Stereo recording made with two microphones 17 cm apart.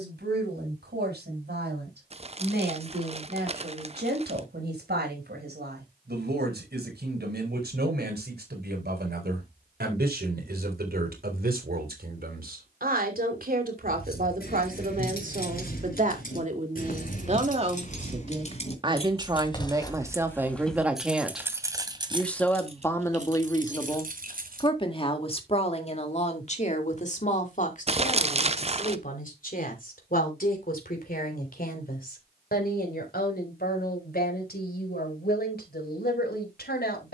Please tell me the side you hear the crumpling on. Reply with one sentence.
You can hear the crumpling on the right.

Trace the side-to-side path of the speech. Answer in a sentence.
In this clip you hear the speech move to the left.